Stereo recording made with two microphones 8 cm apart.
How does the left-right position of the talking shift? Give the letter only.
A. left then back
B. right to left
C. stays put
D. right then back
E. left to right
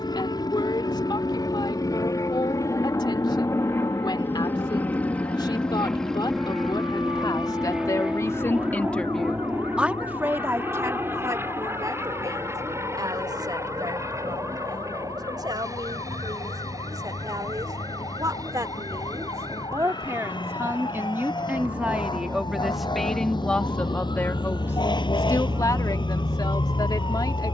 D.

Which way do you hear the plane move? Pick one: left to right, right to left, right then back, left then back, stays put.
left to right.